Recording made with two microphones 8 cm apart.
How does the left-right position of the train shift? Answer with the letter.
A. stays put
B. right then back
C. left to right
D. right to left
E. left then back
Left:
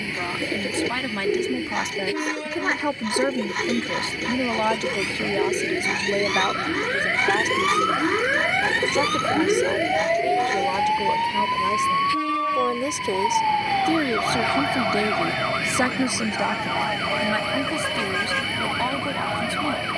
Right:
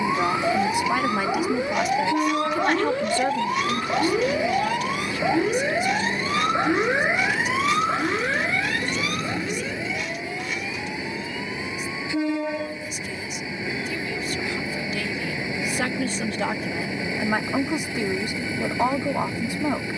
A.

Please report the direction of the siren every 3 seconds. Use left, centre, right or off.
right, right, centre, left, left, left, left.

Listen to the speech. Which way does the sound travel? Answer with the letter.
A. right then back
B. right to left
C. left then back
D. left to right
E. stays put
C.